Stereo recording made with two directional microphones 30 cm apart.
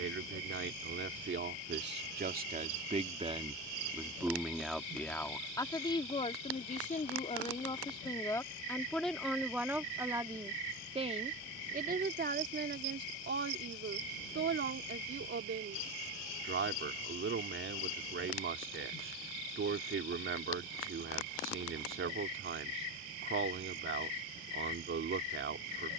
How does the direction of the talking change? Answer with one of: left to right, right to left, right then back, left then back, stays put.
left then back.